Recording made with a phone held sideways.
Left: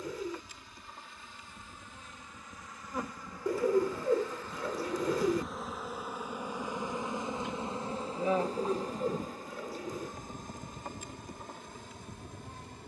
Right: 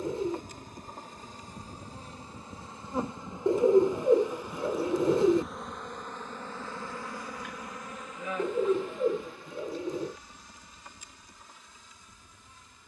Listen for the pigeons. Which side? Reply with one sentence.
In this clip you hear the pigeons on the right.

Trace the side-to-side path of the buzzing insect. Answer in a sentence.
You can hear the buzzing insect move to the left.